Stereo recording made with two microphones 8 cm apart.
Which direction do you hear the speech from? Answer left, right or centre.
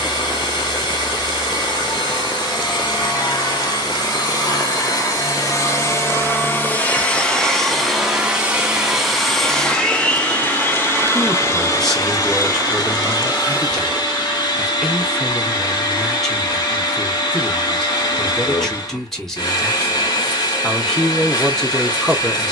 centre.